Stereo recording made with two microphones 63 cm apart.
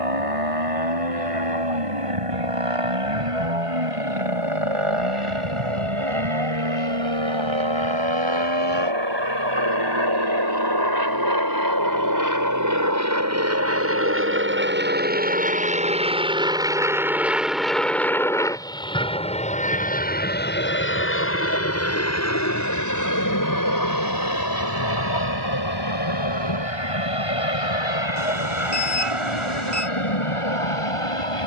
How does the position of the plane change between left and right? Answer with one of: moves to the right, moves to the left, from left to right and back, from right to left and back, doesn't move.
moves to the left.